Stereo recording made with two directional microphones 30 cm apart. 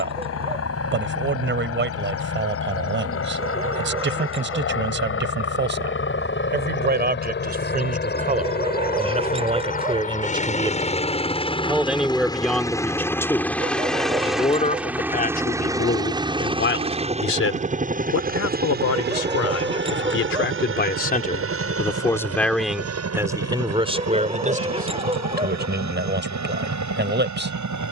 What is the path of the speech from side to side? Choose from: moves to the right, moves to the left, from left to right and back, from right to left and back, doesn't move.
from right to left and back.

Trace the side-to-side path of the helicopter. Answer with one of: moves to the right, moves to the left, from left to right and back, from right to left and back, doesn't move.
moves to the right.